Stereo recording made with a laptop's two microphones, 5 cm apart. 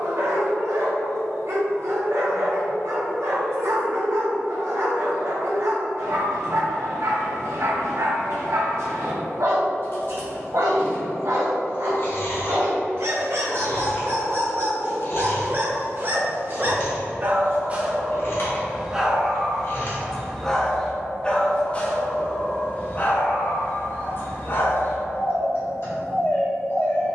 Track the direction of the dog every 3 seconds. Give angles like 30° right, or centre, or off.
70° right, 70° right, 70° right, 70° right, 60° right, 40° right, centre, 30° left, 50° left.